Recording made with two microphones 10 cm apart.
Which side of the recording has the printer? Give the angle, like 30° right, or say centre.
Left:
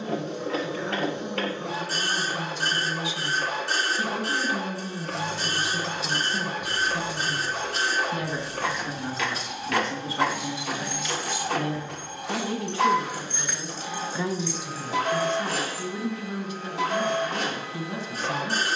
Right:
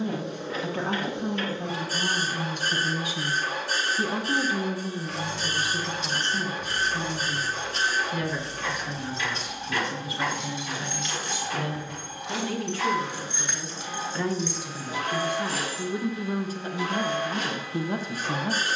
70° left.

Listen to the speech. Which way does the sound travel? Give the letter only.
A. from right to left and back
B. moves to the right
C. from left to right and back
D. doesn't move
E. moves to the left
A.